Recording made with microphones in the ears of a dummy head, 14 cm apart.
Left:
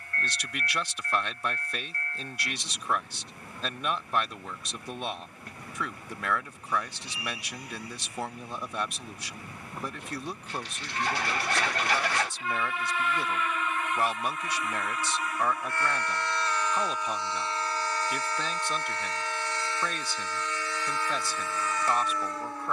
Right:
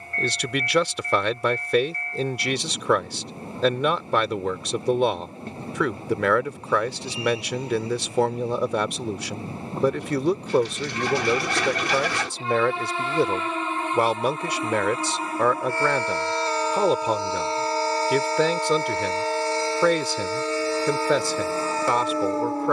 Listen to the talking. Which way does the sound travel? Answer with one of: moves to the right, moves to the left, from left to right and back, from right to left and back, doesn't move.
doesn't move.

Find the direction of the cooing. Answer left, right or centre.
right.